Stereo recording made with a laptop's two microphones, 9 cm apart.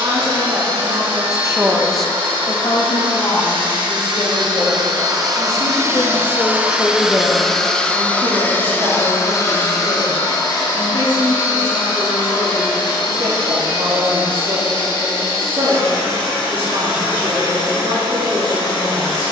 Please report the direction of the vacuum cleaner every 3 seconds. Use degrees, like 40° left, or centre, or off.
70° right, 50° right, centre, 50° left, 60° left, 70° left, 70° left.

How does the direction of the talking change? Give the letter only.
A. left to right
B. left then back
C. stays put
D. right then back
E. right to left
B.